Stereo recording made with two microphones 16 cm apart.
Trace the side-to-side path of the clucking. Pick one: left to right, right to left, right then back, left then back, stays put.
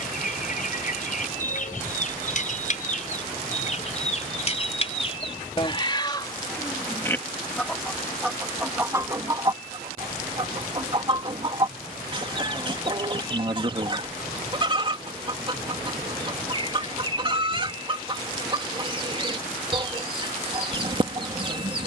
left to right.